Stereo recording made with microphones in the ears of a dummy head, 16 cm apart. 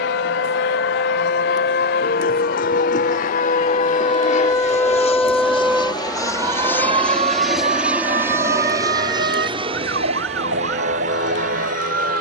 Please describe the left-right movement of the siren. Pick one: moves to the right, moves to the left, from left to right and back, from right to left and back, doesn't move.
moves to the right.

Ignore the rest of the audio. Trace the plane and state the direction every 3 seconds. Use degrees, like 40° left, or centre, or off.
70° left, 40° left, centre, 30° right.